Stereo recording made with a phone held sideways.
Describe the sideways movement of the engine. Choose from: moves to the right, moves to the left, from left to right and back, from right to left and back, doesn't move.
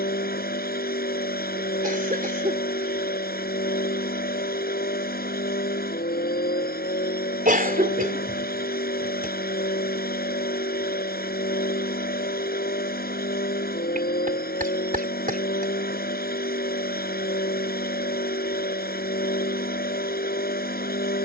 doesn't move.